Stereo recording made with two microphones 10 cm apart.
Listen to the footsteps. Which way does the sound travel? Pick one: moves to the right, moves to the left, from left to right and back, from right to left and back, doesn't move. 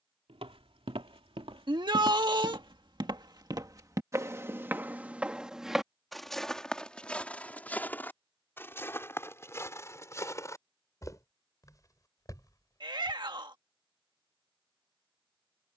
moves to the left.